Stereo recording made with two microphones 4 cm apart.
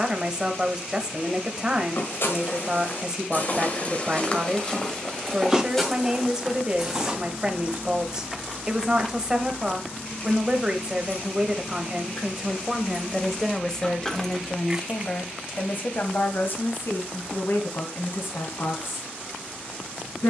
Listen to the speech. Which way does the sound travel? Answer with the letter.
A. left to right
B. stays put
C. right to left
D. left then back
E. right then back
C.